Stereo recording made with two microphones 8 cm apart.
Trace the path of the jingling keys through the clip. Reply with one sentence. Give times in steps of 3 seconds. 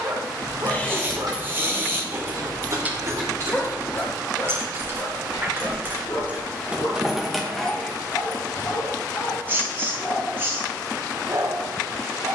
You can hear the jingling keys in the centre from 0 s, on the right from 3 s, in the centre from 6 s and not at all from 9 s.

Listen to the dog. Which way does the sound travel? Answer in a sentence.
You can hear the dog move from right to left and back again.